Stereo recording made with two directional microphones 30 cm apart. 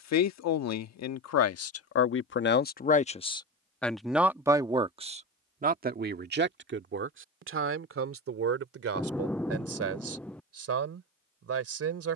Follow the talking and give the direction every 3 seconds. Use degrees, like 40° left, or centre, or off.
50° left, 10° right, 40° right, 50° right.